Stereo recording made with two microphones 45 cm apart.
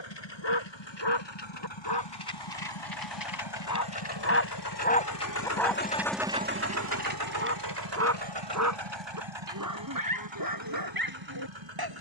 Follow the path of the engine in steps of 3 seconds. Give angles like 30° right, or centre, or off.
80° left, 60° left, 50° right, 80° right.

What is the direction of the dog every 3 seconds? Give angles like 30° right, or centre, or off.
60° left, 30° left, 20° right, 50° right.